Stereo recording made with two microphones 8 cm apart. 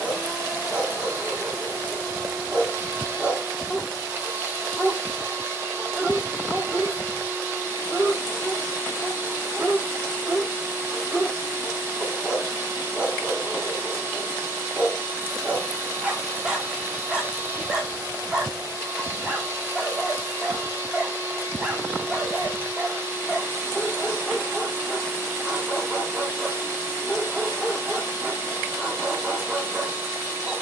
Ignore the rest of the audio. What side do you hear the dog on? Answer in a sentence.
In this clip you hear the dog in the centre.